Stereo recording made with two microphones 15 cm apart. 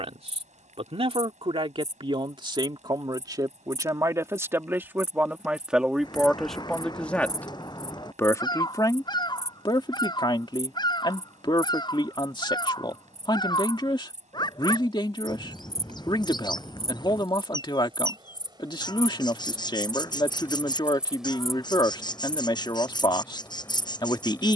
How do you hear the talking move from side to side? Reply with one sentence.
In this clip you hear the talking move to the left.